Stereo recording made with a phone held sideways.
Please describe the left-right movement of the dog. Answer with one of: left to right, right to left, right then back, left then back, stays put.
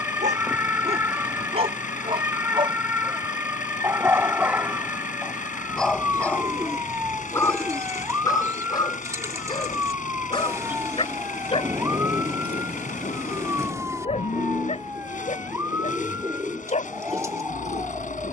right to left.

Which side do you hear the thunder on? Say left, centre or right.
right.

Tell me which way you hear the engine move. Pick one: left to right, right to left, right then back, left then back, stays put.
stays put.